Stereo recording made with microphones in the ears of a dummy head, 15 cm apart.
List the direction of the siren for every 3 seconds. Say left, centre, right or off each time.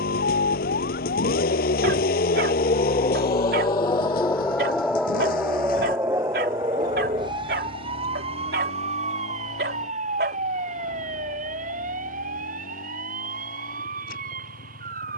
left, centre, right, right, right.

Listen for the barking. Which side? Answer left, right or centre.
right.